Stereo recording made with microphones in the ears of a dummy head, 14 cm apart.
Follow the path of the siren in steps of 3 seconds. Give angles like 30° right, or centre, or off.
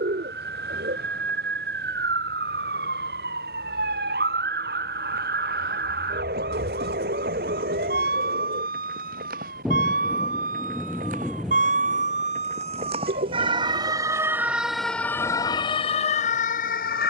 70° right, 70° right, 60° right, 60° right, 30° right, 40° left.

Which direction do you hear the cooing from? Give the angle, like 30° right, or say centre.
70° right.